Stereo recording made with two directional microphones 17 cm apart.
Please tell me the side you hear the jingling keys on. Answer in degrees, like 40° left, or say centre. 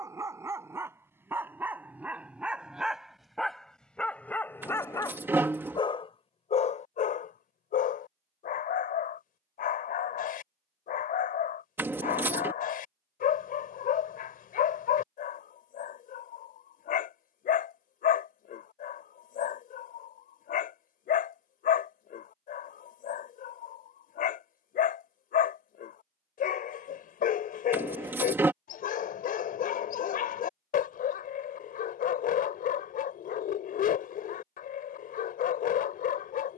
10° right.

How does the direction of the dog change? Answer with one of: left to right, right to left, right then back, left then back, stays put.
right to left.